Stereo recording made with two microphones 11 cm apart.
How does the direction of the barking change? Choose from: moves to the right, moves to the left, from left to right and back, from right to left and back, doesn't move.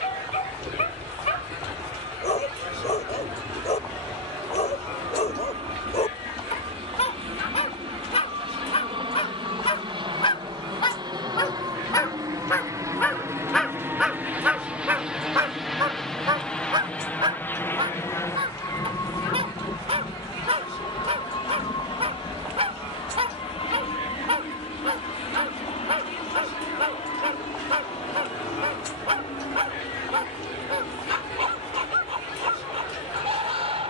moves to the right.